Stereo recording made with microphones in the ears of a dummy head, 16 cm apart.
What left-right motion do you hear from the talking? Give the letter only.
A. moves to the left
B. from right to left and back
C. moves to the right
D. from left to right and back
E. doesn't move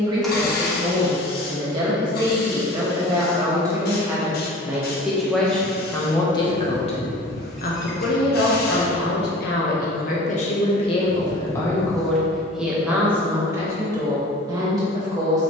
B.